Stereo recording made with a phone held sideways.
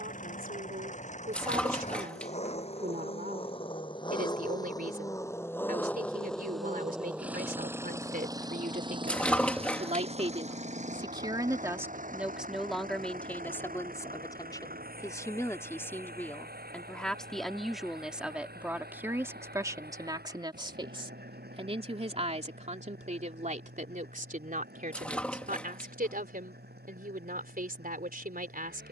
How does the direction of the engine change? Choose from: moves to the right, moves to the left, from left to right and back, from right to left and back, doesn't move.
moves to the right.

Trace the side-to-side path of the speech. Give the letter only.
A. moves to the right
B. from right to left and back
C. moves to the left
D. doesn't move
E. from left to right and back
B.